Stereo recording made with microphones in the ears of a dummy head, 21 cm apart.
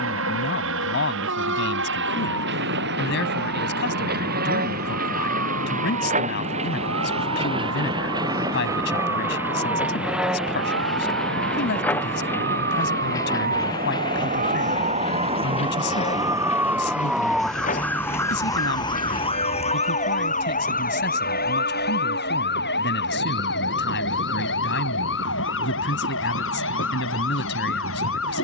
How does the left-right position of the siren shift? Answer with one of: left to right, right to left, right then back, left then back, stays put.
right to left.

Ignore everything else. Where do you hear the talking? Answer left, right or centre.
left.